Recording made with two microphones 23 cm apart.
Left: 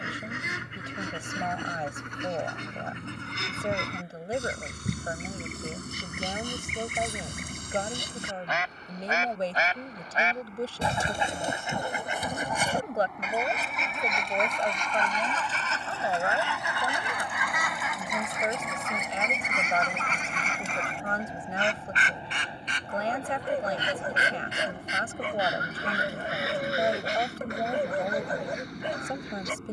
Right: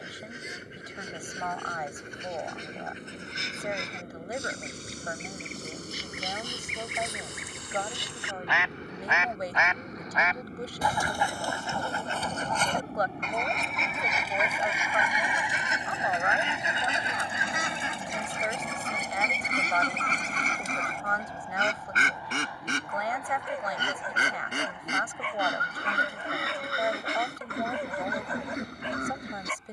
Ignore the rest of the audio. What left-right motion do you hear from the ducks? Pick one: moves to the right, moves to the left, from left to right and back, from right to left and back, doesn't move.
moves to the right.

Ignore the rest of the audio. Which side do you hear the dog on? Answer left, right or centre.
left.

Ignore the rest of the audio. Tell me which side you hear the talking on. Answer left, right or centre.
left.